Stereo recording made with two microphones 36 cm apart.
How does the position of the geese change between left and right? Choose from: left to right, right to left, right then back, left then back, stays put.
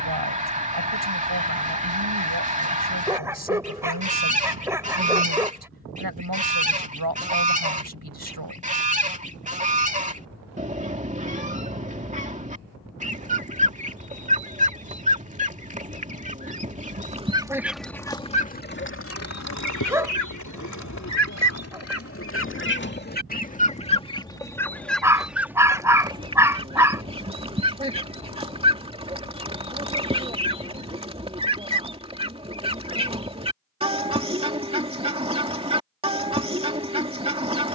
left then back.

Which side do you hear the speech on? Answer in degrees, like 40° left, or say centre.
80° right.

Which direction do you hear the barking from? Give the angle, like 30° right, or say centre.
10° right.